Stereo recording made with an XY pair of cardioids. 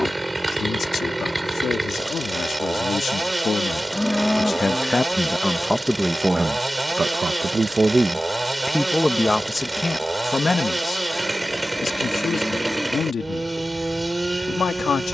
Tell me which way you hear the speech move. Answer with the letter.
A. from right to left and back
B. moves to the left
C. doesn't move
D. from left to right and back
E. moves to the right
D.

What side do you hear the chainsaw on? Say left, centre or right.
centre.